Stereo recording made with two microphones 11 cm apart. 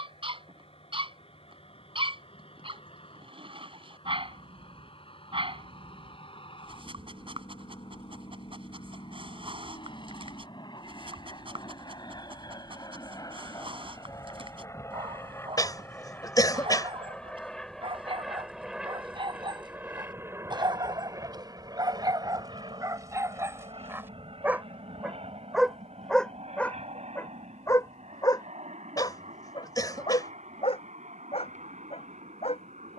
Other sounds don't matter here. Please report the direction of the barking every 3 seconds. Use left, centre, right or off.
right, right, right, right, right, right, right, right, centre, left, left.